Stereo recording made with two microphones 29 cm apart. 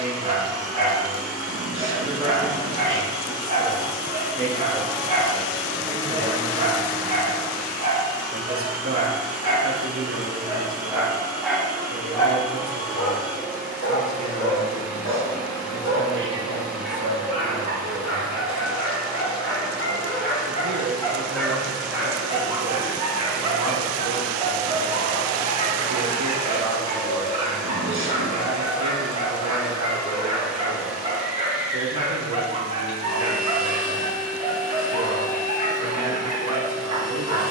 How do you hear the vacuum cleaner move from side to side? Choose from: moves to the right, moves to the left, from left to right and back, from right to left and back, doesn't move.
doesn't move.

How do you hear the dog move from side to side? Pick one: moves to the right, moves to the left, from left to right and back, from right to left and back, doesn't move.
from right to left and back.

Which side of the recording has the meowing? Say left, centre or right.
right.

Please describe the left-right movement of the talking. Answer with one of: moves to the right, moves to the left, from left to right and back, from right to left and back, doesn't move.
moves to the right.